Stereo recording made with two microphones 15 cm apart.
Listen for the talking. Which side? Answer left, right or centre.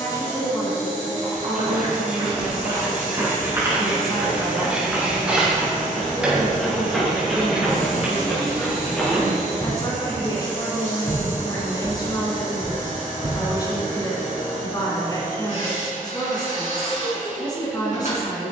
left.